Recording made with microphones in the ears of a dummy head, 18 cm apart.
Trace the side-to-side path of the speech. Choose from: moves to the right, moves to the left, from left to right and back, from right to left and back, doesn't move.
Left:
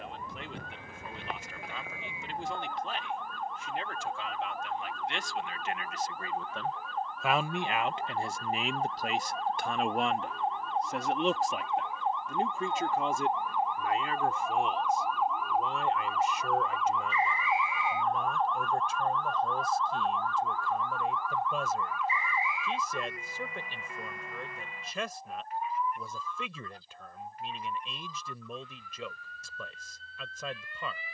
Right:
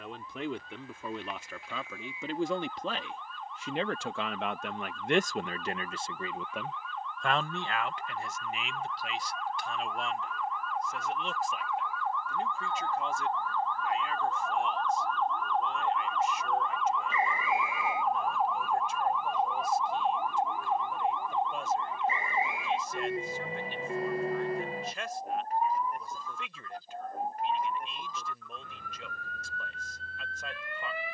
moves to the left.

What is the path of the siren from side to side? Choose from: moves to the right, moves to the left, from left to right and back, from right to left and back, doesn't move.
moves to the right.